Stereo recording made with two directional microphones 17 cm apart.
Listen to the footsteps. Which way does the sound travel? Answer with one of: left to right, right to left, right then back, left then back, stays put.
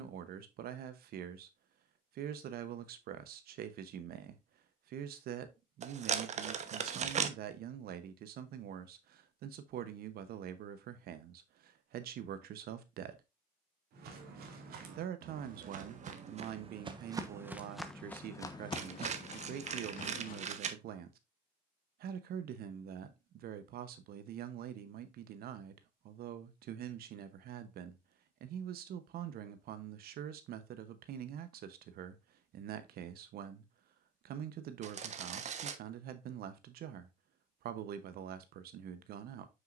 right to left.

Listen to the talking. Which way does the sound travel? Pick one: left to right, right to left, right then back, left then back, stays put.
stays put.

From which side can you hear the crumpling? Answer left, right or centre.
right.